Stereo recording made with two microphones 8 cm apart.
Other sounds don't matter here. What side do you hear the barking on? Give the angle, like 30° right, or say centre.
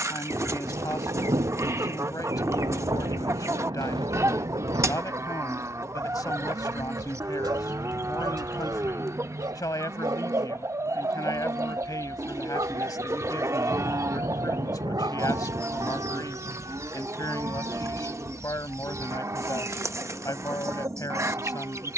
60° right.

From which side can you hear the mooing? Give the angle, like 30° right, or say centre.
40° right.